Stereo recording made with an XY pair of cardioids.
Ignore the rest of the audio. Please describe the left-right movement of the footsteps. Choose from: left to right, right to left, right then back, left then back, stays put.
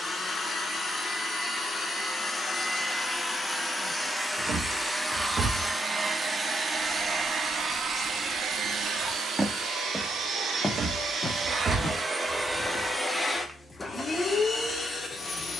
right then back.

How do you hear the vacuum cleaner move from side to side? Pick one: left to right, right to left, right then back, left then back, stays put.
right then back.